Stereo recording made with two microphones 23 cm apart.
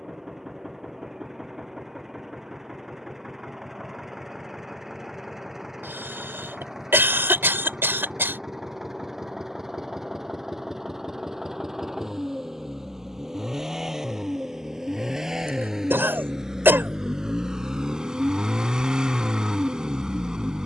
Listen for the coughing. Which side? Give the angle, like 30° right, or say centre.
10° right.